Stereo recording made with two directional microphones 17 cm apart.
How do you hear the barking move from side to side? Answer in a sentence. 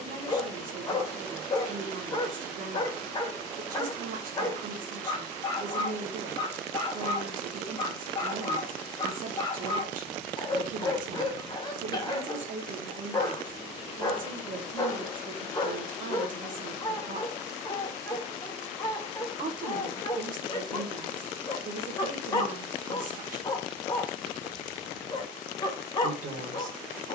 You can hear the barking stay put.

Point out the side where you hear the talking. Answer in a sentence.
You can hear the talking on the right.